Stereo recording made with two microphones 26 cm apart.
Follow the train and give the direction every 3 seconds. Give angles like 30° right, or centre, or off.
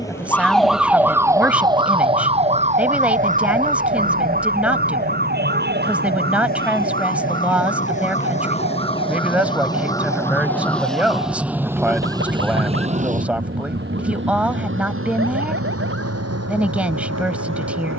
50° left, 40° left, 30° left, 10° left, 30° right, 70° right.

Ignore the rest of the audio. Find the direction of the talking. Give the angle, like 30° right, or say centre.
10° right.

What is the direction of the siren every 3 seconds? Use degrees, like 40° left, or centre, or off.
10° right, 30° right, 40° right, 50° right, 50° right, 50° right.